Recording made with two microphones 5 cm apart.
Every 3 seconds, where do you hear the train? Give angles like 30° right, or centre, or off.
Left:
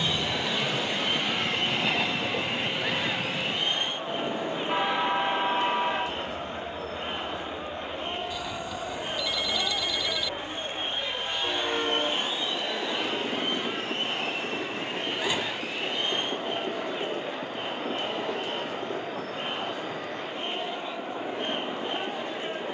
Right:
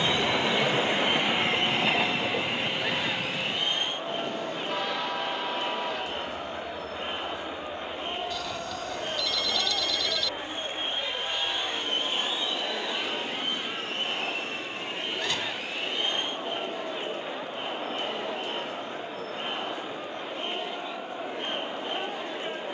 20° right, 20° left, 40° left, 50° left, 60° left, 60° left, 60° left, 60° left.